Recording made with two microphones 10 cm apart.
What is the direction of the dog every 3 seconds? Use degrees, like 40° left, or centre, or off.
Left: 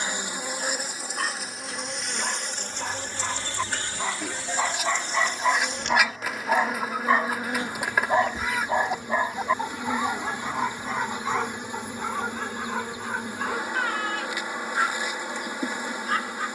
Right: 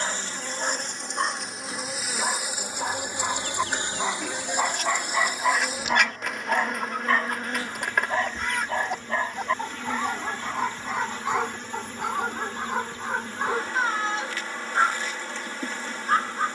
20° right, 10° right, 20° left, centre, 20° right, 30° right.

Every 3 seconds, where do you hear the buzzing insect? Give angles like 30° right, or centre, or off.
centre, 20° right, 10° left, 10° left, 10° left, 10° left.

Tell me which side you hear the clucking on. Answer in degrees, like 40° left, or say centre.
centre.